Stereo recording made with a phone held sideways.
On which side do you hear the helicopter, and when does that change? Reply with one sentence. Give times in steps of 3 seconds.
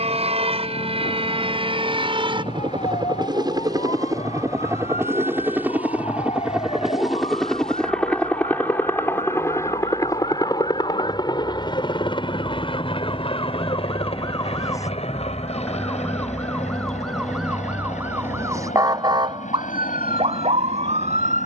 In this clip you hear the helicopter on the right from 0 s, in the centre from 6 s and on the left from 9 s.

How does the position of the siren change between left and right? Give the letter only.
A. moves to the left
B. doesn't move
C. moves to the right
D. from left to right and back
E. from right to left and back
C.